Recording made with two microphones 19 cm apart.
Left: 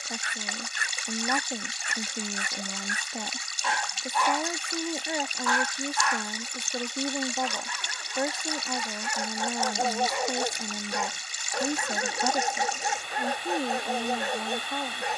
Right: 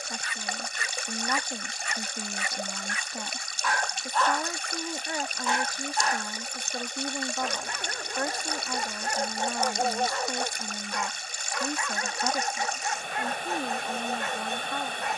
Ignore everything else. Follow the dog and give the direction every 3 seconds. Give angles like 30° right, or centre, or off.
50° left, centre, 50° right, 10° left, 40° left.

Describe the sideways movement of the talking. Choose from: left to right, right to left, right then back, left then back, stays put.
stays put.